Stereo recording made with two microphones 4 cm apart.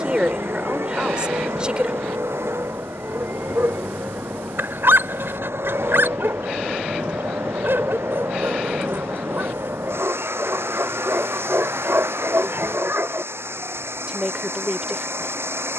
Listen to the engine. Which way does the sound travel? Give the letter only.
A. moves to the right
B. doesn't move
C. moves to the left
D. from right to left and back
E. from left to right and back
B.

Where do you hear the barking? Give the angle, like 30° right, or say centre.
60° right.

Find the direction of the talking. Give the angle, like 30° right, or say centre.
20° right.